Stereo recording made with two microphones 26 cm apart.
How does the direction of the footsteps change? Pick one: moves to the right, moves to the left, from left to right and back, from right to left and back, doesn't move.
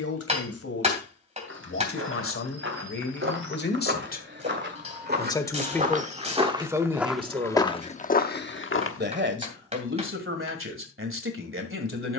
moves to the left.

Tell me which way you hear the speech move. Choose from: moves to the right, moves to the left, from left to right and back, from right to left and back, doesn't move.
moves to the right.